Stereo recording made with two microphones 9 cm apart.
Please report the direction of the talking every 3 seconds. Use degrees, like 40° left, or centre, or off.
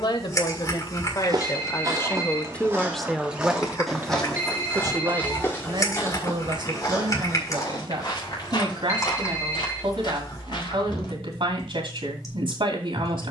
30° left, 30° right, 60° right, 70° right, 70° right.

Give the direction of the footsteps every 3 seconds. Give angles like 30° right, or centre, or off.
40° right, 10° left, 40° left, 50° left, off.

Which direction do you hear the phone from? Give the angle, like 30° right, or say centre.
20° right.